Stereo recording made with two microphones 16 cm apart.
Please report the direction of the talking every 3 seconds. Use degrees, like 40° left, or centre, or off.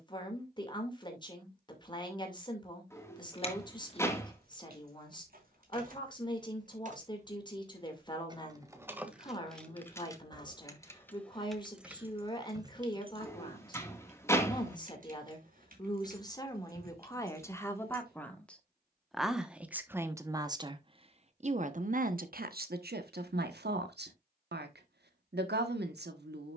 30° left, 30° left, 30° left, 30° left, 30° left, 20° left, 10° right, 70° right, 80° right.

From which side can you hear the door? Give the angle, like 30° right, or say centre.
10° left.